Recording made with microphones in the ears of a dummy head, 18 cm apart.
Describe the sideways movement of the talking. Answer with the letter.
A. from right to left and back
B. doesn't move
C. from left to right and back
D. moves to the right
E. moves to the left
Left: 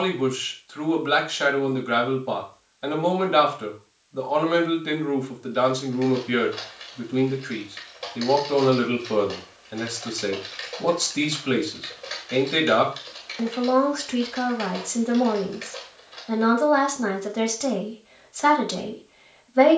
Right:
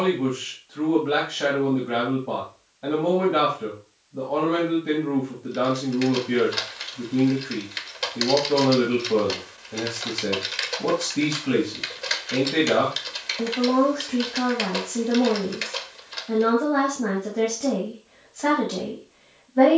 B.